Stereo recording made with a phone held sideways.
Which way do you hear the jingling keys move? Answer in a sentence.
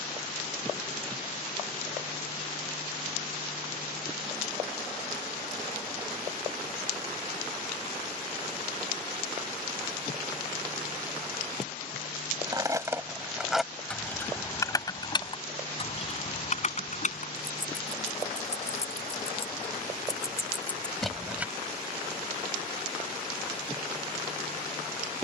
In this clip you hear the jingling keys go left and come back.